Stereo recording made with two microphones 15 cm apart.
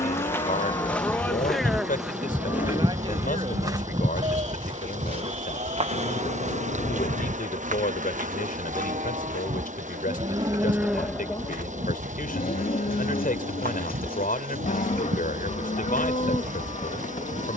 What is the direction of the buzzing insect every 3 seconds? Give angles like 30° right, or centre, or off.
centre, 30° right, 60° right, 70° right, 70° right, 70° right.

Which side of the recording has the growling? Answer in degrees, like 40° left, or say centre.
70° left.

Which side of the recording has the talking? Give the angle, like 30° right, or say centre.
70° left.